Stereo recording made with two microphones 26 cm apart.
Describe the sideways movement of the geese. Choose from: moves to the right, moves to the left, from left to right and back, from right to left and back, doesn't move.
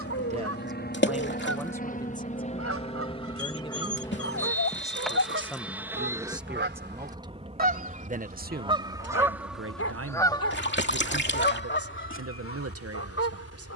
moves to the left.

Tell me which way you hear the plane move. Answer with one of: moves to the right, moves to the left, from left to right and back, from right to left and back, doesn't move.
moves to the right.